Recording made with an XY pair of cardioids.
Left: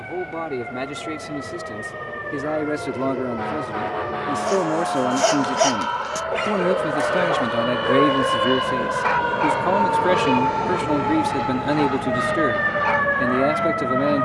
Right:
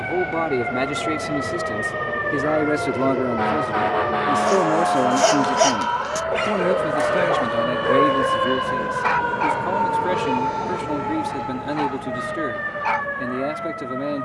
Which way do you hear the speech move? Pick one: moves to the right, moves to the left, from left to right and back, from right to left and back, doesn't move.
moves to the left.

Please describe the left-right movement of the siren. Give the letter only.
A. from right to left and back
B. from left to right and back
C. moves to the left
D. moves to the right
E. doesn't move
C.